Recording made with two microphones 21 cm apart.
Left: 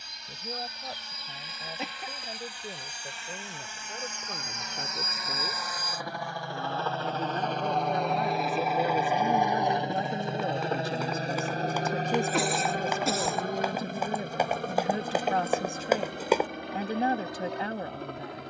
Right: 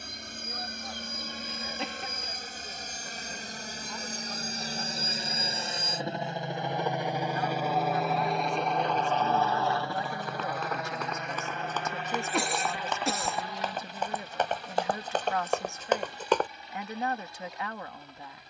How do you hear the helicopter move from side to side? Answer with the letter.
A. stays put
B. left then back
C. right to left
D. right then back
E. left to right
C.